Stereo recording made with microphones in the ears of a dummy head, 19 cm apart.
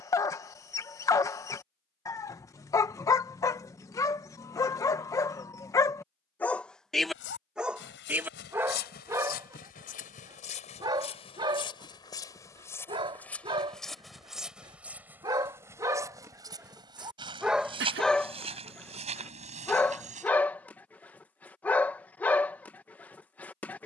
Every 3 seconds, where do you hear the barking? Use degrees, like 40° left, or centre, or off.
10° left, 10° left, centre, 20° right, 20° right, 10° right, 10° left, 10° left.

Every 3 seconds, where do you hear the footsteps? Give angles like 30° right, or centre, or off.
off, off, 50° left, 30° left, 10° left, 20° right, 30° right, off.